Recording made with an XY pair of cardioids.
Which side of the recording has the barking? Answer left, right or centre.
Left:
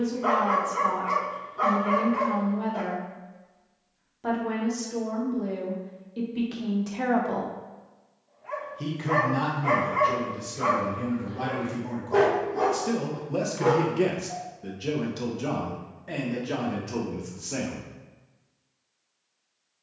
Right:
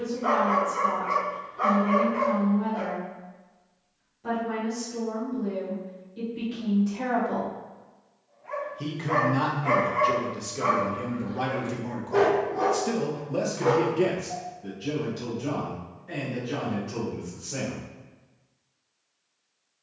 left.